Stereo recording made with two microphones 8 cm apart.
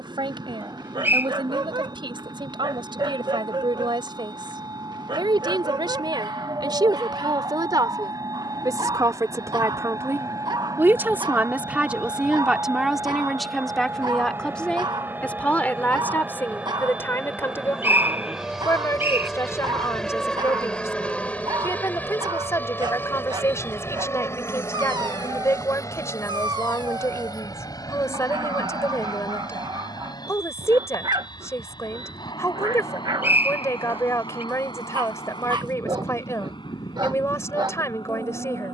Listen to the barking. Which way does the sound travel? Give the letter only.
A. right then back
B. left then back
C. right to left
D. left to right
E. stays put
E.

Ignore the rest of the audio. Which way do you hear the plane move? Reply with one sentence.
In this clip you hear the plane travel towards the left.